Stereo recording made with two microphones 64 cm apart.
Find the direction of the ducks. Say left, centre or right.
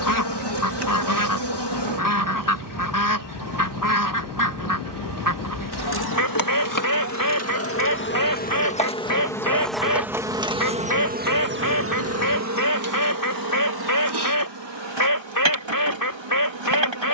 left.